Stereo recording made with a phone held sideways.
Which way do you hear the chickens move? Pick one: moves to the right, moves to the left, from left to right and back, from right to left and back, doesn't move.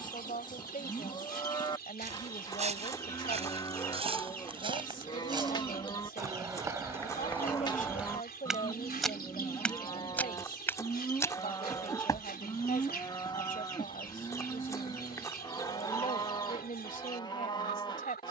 doesn't move.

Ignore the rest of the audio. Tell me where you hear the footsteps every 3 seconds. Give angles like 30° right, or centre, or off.
50° right, 40° right, 10° right, 10° left, 30° left, 40° left.